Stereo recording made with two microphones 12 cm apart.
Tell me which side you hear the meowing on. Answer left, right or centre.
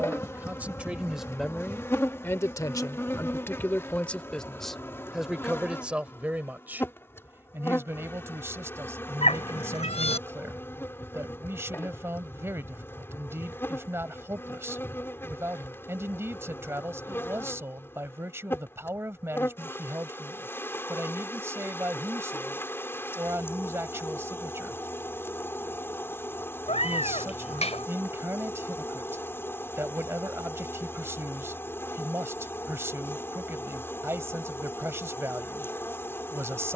left.